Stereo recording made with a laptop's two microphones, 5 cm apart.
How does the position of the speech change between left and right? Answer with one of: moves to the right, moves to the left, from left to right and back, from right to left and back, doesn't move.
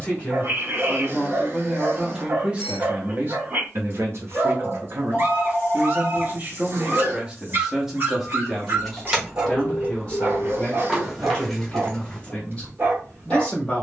from left to right and back.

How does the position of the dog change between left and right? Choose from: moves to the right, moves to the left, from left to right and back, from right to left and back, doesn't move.
doesn't move.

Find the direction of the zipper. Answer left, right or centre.
right.